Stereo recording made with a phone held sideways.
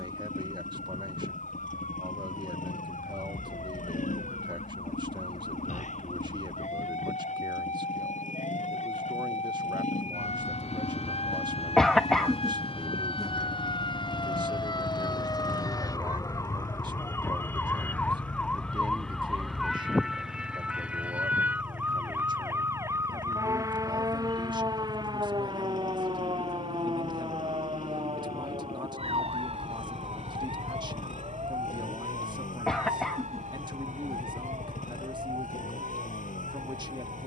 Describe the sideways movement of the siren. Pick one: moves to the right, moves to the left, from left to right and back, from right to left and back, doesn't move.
moves to the right.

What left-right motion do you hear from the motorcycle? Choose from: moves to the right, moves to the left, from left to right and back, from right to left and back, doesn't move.
doesn't move.